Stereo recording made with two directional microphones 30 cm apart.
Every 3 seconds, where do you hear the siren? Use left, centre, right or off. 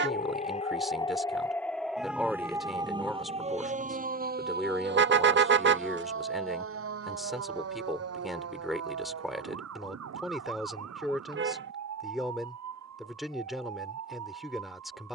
centre, right, right, right, right.